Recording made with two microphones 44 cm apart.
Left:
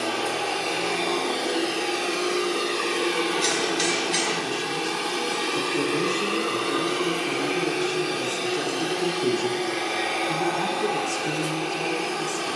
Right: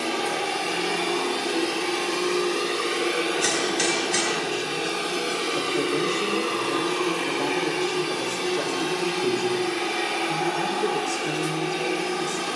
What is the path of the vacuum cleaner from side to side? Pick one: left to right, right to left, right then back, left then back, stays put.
left then back.